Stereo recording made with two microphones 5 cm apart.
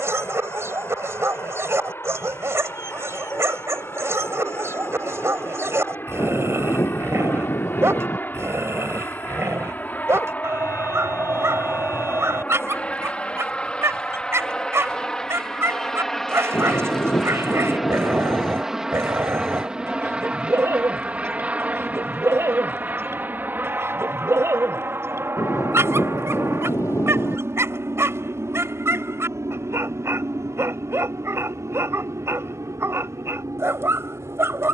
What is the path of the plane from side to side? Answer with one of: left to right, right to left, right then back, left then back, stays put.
left to right.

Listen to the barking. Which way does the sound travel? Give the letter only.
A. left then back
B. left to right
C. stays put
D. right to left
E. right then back
C.